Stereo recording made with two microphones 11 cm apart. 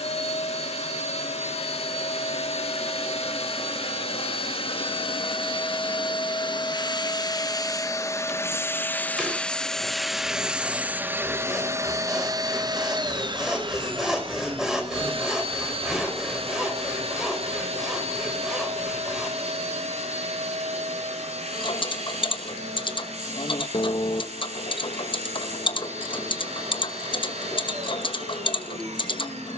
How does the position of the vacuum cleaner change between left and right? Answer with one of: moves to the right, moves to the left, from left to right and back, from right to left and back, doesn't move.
moves to the right.